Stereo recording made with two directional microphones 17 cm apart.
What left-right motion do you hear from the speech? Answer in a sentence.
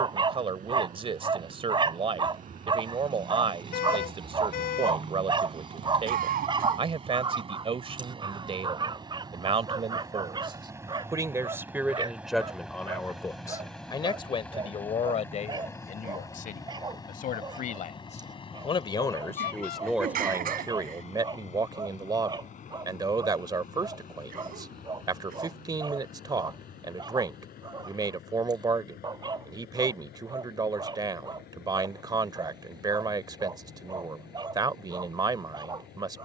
You can hear the speech move from right to left and back again.